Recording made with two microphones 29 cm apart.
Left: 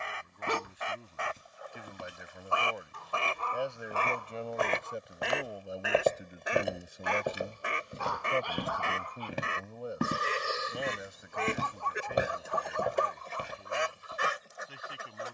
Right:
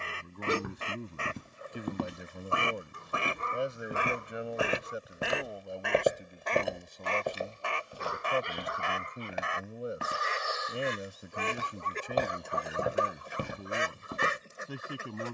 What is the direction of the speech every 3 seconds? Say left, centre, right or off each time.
right, centre, centre, right, right.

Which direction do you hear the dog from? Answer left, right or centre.
right.